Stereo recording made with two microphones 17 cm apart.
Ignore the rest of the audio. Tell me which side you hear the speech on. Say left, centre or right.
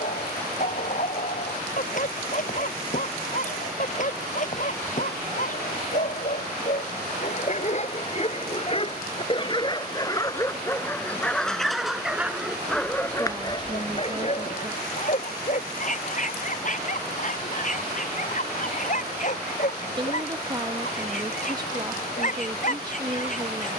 right.